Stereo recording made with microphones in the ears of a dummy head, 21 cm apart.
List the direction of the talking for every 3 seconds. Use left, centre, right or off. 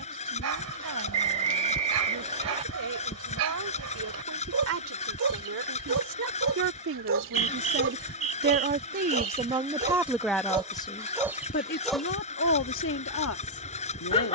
right, right, right, centre, left.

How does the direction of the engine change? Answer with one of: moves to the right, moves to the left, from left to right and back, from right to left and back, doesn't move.
doesn't move.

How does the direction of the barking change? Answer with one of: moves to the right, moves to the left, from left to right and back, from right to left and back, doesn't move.
moves to the left.